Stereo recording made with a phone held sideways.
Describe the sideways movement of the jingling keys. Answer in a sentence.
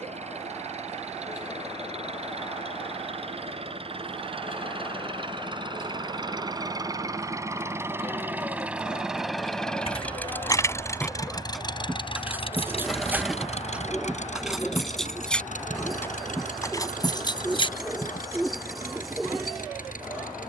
In this clip you hear the jingling keys move from left to right and back again.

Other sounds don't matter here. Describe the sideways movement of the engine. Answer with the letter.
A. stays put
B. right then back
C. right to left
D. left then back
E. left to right
C.